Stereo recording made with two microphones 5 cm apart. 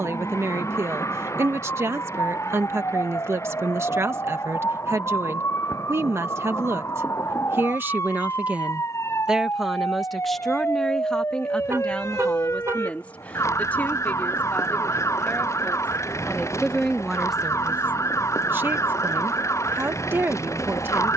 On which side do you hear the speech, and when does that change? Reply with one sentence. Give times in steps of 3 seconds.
You can hear the speech on the right from 0 s, in the centre from 9 s, on the left from 12 s, in the centre from 15 s and on the right from 18 s.